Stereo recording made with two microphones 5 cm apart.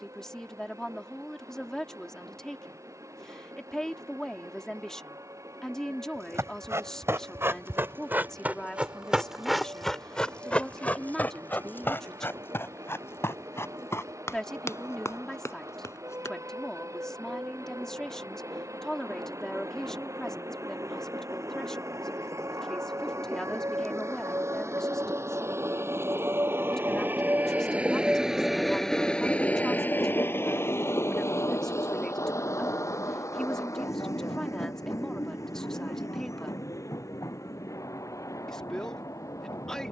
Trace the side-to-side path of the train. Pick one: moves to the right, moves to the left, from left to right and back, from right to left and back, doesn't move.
moves to the left.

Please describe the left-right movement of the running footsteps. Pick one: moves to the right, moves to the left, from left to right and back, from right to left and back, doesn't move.
moves to the left.